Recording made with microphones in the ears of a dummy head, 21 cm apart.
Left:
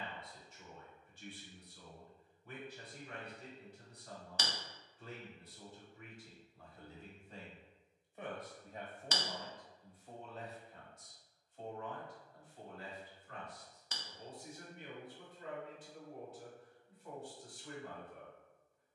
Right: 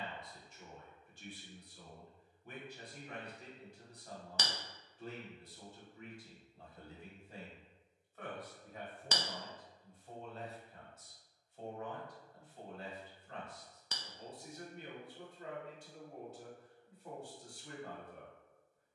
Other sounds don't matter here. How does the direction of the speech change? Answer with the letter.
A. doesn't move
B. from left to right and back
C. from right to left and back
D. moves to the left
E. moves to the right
C.